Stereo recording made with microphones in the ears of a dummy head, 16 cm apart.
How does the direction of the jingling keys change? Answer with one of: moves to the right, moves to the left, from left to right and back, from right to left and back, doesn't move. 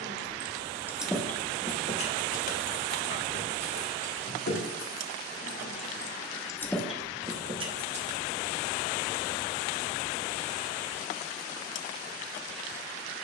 from right to left and back.